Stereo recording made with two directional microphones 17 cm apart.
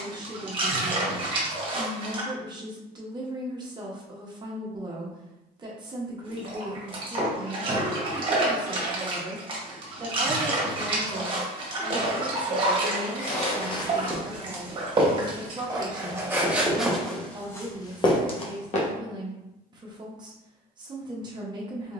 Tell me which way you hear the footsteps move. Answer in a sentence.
You can hear the footsteps go right and come back.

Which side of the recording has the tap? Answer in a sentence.
You can hear the tap on the right.